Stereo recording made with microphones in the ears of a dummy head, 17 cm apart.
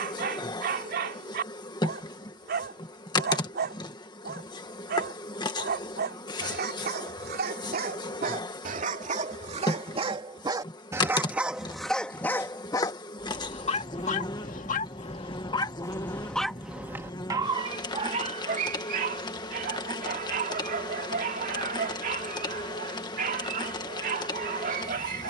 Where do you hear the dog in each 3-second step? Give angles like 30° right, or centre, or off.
50° right, 50° right, 50° right, 20° right, 30° left, centre, 40° right, 50° right, 50° right.